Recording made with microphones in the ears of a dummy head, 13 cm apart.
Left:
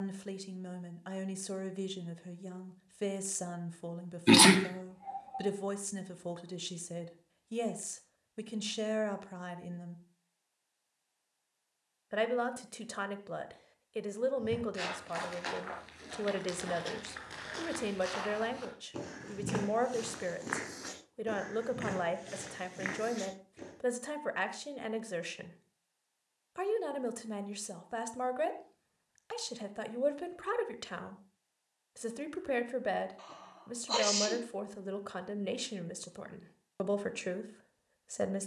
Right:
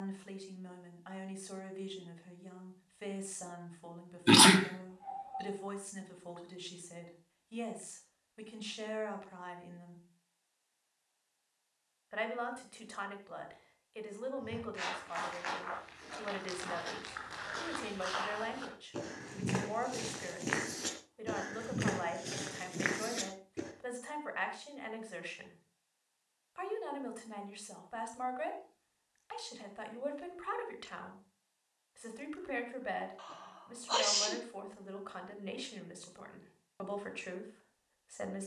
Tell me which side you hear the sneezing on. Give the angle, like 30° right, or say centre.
10° left.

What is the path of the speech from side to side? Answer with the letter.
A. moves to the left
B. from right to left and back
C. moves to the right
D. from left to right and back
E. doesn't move
E.